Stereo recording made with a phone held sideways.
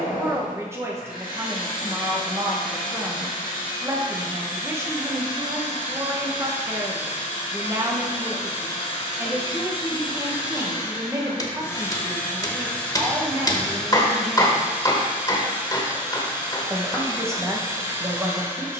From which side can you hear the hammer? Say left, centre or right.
left.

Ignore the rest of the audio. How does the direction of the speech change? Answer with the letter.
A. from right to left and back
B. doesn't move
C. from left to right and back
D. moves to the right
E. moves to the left
B.